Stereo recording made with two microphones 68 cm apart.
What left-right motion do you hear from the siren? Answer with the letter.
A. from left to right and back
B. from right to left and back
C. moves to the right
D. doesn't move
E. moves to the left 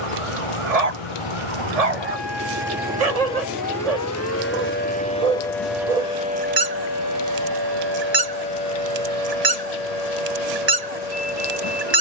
C.